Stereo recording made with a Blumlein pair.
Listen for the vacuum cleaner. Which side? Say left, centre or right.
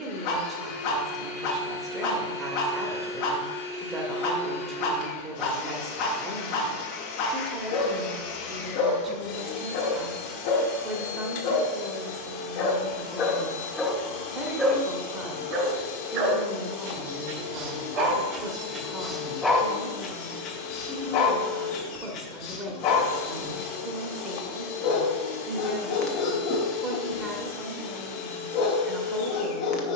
left.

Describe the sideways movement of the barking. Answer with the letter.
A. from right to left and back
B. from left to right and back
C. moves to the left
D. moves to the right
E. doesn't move
B.